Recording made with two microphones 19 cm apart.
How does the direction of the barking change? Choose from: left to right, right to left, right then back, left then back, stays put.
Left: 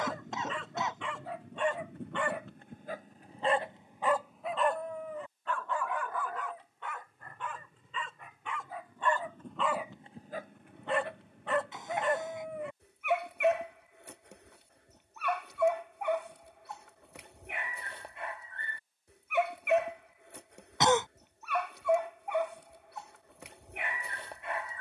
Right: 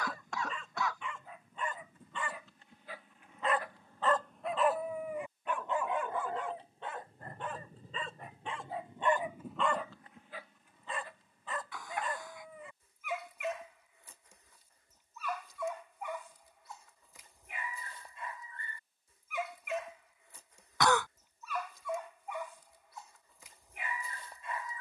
right then back.